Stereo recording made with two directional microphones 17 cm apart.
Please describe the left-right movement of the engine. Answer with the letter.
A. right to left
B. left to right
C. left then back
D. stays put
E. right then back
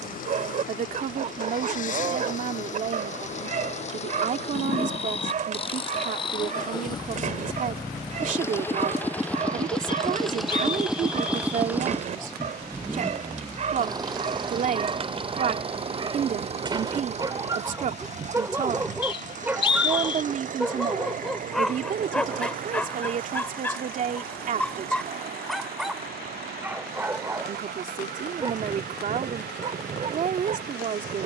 B.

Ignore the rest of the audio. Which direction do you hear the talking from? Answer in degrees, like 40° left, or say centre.
50° right.